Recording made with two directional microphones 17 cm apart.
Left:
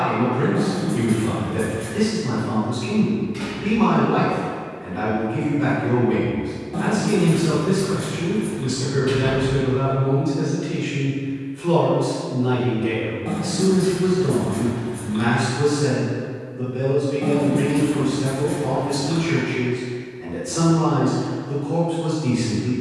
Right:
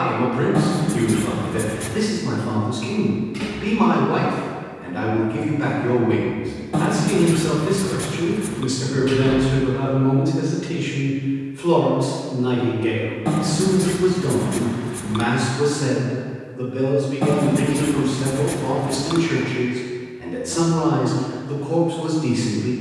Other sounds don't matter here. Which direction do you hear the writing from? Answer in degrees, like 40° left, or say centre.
50° right.